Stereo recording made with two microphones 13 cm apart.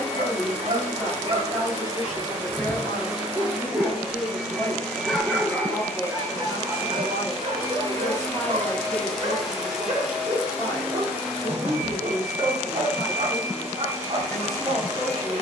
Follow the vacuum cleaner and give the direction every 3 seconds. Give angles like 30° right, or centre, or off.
20° right, centre, 20° left, 10° right, 20° right.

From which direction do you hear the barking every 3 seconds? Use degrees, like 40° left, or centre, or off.
40° right, centre, 40° right, 50° right, 50° right.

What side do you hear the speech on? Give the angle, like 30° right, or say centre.
centre.